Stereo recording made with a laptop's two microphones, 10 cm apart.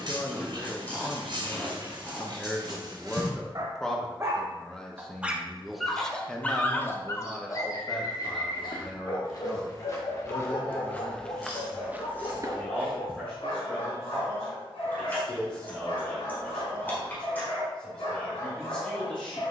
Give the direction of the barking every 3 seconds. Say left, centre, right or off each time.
right, right, left, left, left, left, left.